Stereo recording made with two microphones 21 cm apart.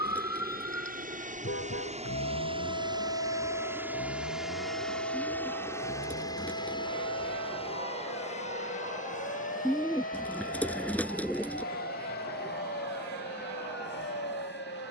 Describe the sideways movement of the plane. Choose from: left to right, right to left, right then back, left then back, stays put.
right to left.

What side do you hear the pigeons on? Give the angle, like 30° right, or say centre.
10° left.